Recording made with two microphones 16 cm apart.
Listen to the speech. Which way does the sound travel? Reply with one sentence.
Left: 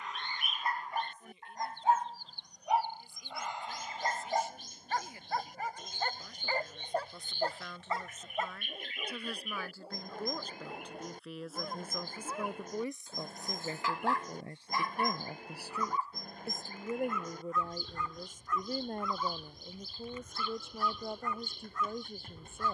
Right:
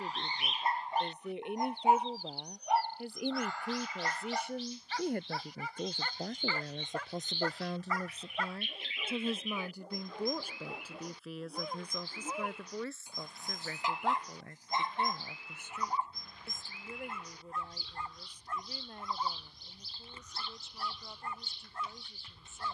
You can hear the speech move from right to left.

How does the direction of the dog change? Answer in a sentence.
In this clip you hear the dog go left and come back.